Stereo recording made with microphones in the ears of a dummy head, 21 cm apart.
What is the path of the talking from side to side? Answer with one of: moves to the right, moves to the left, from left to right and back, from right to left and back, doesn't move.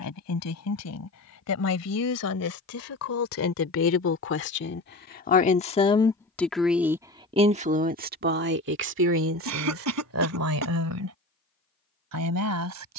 moves to the right.